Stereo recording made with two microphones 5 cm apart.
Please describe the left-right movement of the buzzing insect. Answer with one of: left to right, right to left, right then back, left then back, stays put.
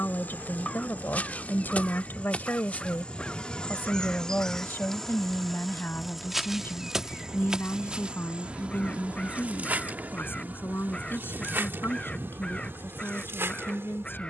left to right.